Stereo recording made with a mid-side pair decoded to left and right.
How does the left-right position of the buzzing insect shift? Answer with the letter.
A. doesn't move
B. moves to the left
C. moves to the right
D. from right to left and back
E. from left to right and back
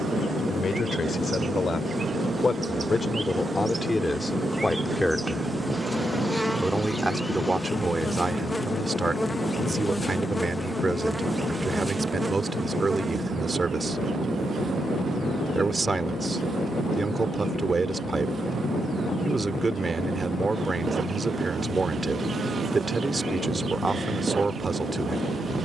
D.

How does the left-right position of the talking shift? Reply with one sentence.
In this clip you hear the talking move to the right.